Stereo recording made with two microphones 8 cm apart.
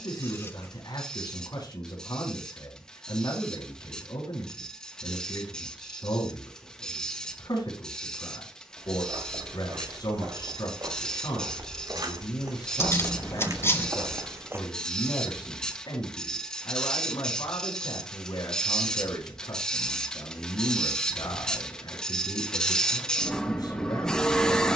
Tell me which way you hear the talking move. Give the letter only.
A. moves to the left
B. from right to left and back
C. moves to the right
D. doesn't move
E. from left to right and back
D.